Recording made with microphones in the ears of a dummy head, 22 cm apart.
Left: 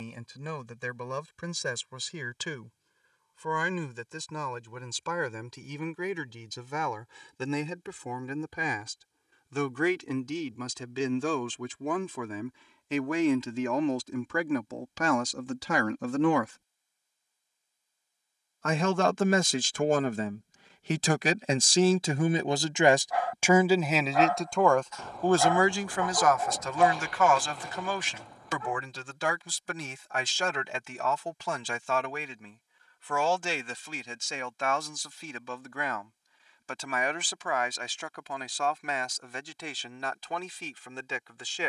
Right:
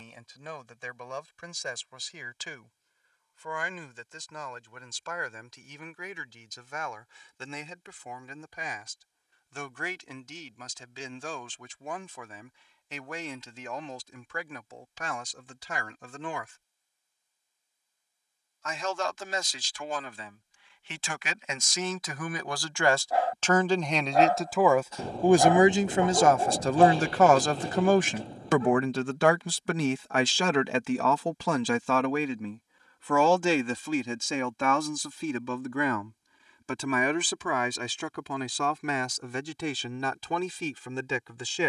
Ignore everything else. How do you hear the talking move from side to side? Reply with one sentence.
In this clip you hear the talking move to the right.